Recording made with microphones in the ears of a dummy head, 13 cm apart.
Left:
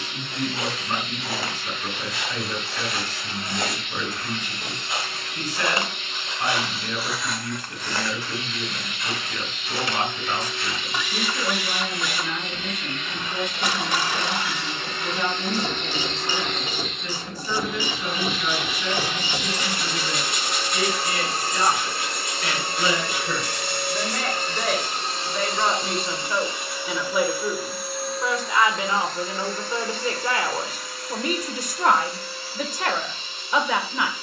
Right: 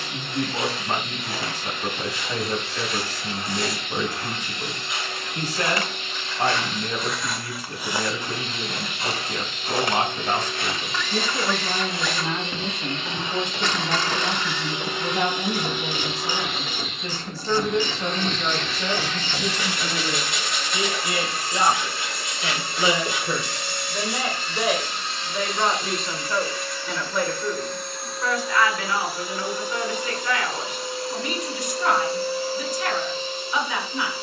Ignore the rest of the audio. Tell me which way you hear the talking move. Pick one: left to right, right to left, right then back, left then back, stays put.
right to left.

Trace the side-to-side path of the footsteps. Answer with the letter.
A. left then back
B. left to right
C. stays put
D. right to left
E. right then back
B.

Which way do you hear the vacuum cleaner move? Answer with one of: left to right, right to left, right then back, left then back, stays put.
left then back.